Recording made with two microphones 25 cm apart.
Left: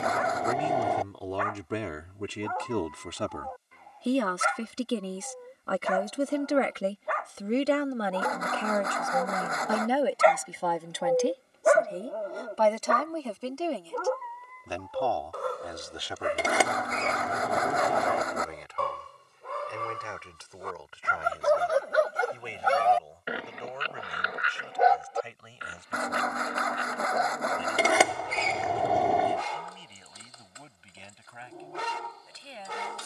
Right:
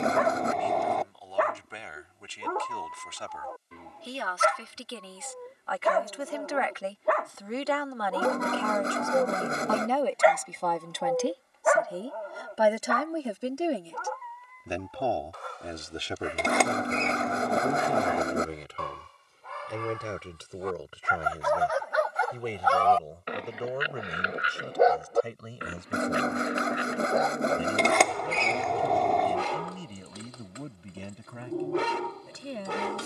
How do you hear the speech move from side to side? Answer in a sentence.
You can hear the speech go from the left side to the right.